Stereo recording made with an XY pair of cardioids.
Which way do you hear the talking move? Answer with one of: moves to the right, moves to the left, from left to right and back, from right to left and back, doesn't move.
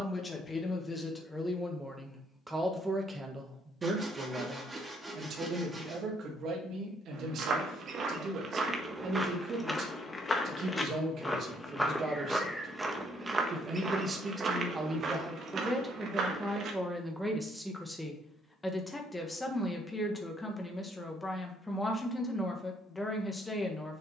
from left to right and back.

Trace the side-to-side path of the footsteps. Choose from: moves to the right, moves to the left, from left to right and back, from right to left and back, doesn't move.
from right to left and back.